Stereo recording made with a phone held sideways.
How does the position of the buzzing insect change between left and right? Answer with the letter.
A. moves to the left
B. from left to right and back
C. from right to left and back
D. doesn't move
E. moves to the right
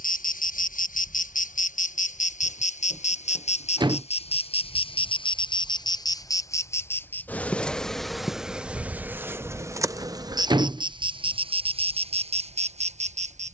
E.